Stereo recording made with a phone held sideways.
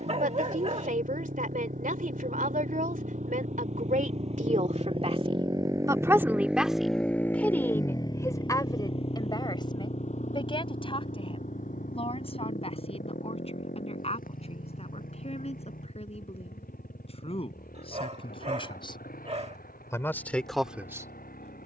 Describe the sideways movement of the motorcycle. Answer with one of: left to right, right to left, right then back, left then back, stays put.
right to left.